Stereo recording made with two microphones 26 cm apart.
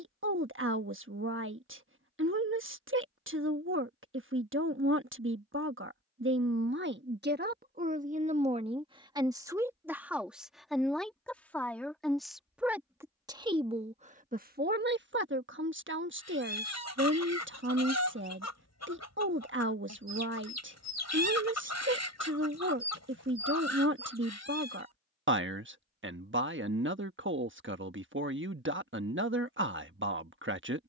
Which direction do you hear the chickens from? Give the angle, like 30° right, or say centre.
80° left.